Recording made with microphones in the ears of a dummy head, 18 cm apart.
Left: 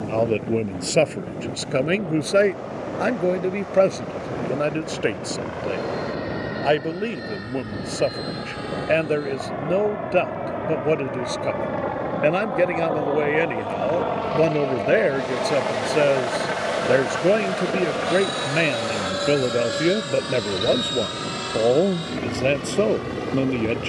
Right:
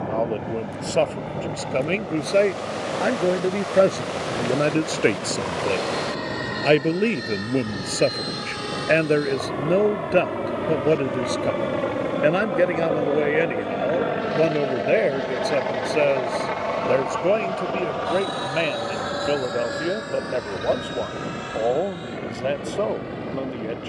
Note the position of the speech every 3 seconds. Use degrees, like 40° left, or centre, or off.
20° left, 20° right, 30° right, 20° right, centre, 10° left, 30° left, 40° left.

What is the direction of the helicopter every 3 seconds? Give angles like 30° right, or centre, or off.
70° right, 70° right, 60° right, 50° right, 30° right, 10° left, 40° left, 50° left.